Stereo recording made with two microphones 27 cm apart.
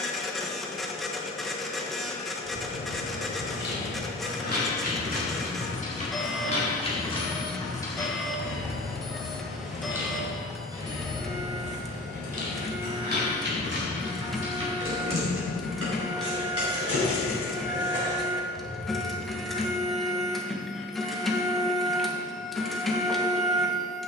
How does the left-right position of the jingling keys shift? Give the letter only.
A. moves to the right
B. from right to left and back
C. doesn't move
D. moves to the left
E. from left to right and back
A.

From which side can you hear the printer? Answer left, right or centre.
centre.